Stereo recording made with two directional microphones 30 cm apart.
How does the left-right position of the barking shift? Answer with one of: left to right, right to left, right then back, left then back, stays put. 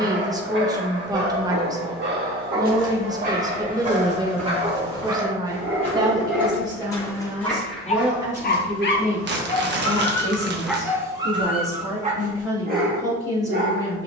left then back.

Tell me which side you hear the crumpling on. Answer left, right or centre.
right.